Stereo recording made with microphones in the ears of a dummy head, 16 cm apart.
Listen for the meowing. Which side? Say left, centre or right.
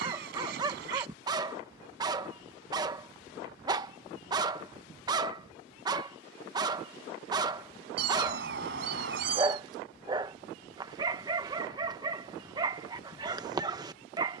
right.